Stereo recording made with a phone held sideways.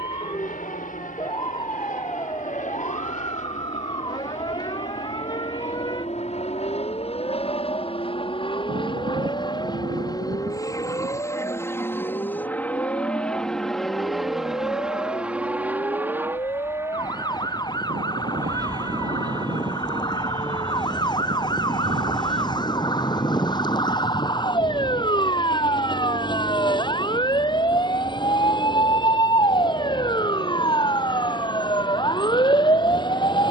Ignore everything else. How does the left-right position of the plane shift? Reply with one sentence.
In this clip you hear the plane move from left to right.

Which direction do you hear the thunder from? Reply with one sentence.
In this clip you hear the thunder on the right.